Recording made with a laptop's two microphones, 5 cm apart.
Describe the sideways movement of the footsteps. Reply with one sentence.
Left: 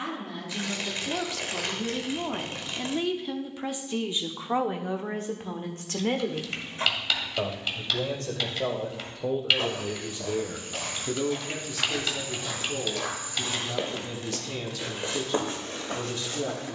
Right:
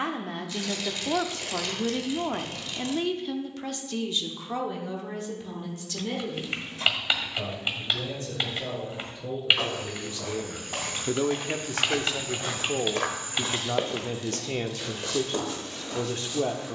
In this clip you hear the footsteps move to the left.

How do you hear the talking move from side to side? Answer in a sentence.
In this clip you hear the talking go left and come back.